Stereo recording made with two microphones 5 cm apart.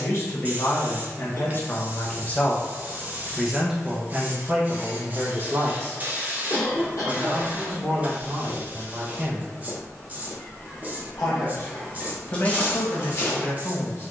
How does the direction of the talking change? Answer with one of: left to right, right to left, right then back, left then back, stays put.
right then back.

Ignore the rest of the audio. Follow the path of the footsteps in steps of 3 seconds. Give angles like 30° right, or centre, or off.
off, off, 50° left, 10° left, 40° left.